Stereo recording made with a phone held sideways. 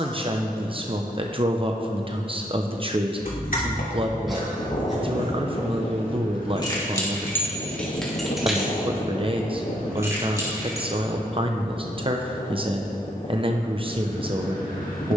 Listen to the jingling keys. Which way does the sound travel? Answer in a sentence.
In this clip you hear the jingling keys move to the right.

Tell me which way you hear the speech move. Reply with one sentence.
You can hear the speech stay put.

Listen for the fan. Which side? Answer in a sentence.
In this clip you hear the fan on the left.